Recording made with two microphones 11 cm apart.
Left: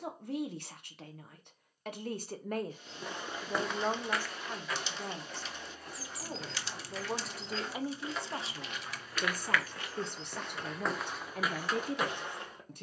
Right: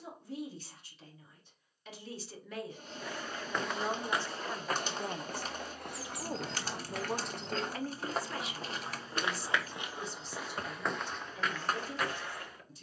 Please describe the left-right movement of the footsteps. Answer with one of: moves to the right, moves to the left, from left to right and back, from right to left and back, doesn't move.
from left to right and back.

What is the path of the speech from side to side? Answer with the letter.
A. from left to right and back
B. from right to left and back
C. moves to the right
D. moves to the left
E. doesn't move
A.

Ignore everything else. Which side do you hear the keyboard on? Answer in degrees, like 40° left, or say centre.
50° right.